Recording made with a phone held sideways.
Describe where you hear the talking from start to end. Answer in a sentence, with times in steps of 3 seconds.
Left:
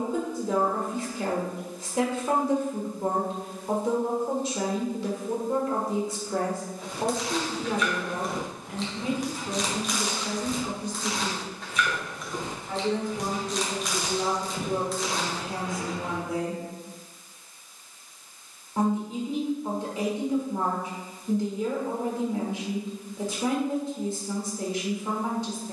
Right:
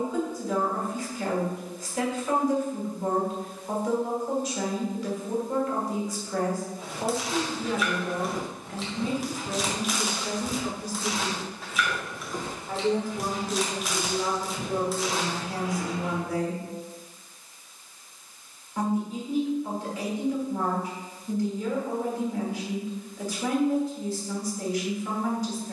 In this clip you hear the talking on the left from 0 s, in the centre from 9 s and on the left from 15 s.